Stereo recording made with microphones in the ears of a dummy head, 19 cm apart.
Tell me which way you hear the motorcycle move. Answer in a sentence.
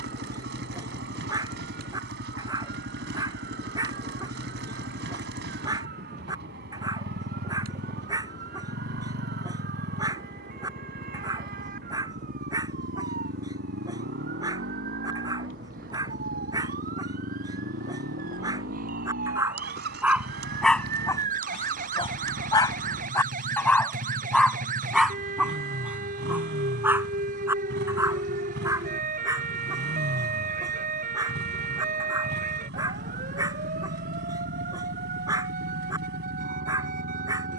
You can hear the motorcycle stay in one place.